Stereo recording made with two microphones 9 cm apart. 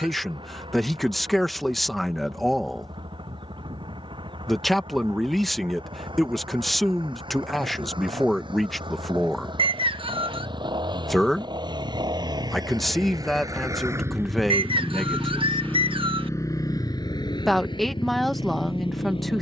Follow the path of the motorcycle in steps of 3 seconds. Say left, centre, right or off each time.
right, right, right, right, right, left, left.